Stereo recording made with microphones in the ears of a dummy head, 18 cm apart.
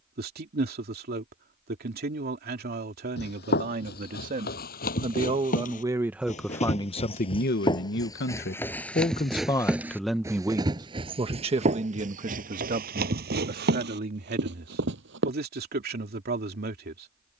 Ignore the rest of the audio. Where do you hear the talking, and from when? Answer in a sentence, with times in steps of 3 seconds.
In this clip you hear the talking on the right from 0 s, on the left from 6 s, in the centre from 9 s and on the right from 12 s.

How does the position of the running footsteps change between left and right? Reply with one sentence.
You can hear the running footsteps move to the right.